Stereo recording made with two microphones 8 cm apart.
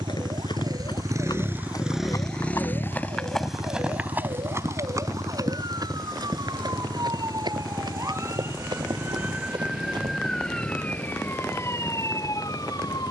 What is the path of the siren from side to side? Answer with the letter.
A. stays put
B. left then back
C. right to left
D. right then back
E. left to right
C.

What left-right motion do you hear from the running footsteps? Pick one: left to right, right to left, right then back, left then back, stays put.
left to right.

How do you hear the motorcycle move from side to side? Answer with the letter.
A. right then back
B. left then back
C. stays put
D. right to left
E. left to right
D.